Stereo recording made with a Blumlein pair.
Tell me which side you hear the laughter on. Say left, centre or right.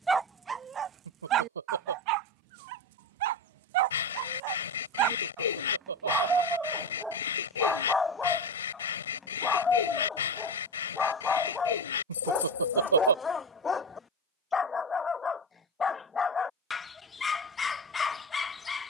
right.